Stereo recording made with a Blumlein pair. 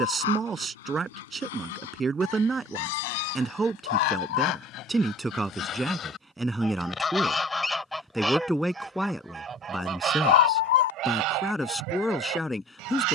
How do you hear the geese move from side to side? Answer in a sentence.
In this clip you hear the geese go from the left side to the right.